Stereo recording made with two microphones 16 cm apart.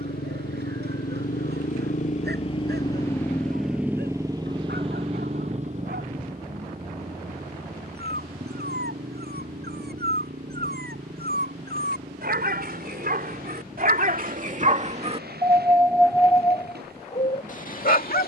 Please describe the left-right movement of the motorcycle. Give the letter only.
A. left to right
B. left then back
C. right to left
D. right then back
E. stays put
A.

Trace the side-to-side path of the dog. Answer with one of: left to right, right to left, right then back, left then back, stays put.
right to left.